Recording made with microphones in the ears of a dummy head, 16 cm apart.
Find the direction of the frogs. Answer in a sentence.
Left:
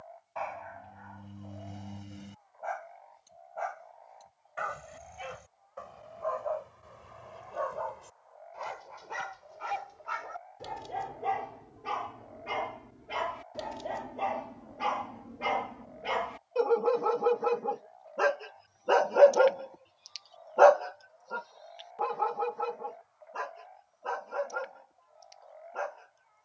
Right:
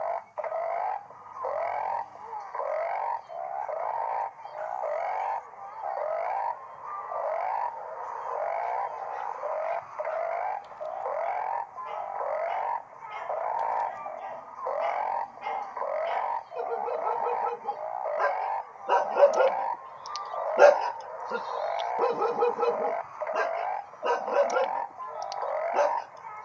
You can hear the frogs on the right.